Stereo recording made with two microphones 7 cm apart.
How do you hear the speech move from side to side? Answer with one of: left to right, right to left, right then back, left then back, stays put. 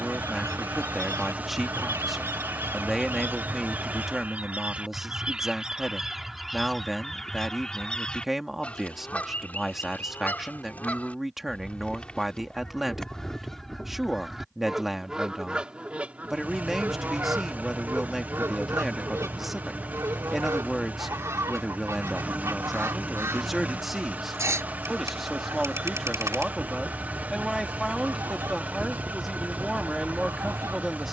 stays put.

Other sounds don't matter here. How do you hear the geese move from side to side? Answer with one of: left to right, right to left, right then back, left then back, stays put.
left then back.